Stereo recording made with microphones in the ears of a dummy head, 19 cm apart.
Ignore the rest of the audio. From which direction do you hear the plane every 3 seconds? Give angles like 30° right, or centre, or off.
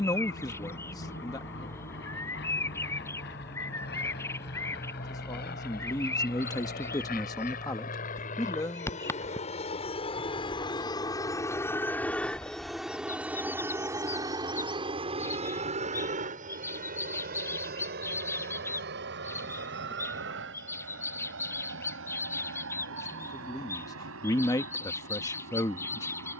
70° left, 60° left, 50° left, 30° left, 10° right, 40° right, 60° right, 60° right, 70° right.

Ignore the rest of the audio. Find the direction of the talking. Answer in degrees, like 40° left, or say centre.
20° left.